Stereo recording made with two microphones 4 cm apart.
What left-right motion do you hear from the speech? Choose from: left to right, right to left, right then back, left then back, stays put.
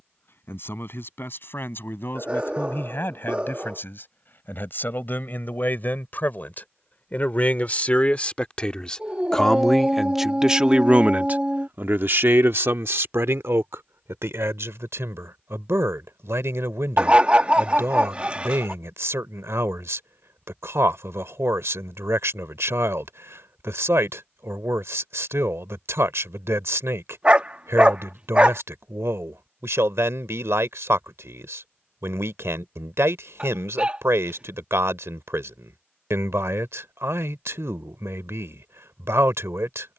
left to right.